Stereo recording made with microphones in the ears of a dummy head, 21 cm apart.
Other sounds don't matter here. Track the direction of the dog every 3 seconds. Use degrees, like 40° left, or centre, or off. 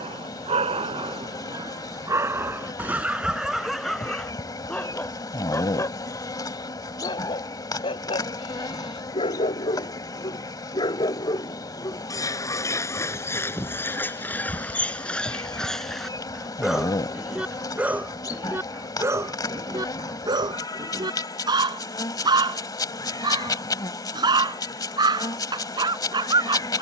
20° right, centre, 20° left, 20° left, 10° left, centre, 10° right, 20° right, 20° right.